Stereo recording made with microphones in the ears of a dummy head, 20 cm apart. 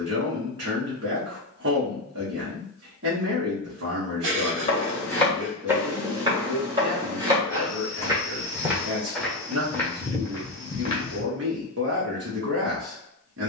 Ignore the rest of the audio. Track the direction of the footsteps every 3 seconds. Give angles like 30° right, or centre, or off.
off, 10° left, 10° right, 10° left, off.